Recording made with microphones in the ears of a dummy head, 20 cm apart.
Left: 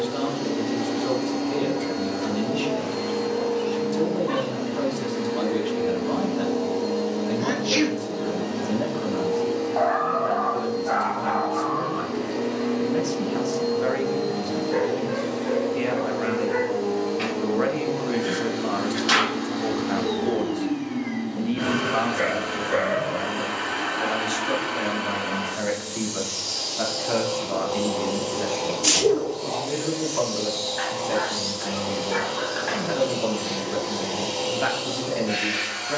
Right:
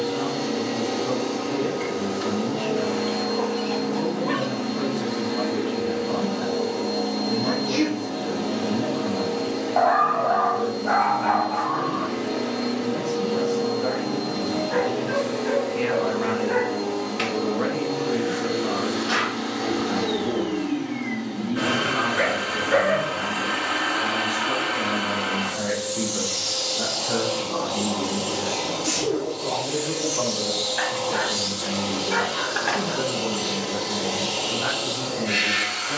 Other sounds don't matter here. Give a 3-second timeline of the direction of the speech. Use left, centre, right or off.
left, left, left, left, left, centre, left, left, left, left, left, left.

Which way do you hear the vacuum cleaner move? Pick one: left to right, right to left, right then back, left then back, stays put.
stays put.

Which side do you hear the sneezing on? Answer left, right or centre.
left.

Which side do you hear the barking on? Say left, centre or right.
right.